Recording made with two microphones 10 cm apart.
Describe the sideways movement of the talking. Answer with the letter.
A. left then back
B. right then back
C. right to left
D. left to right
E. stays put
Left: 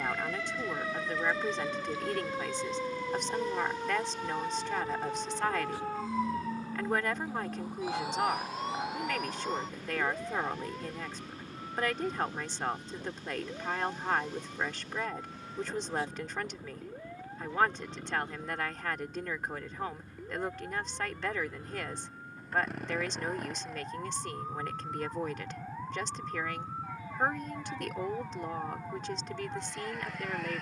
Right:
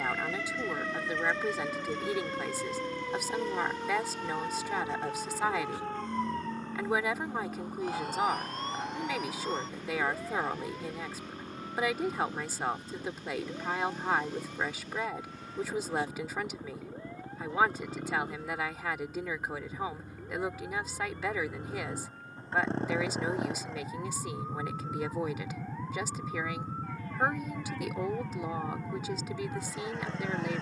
E.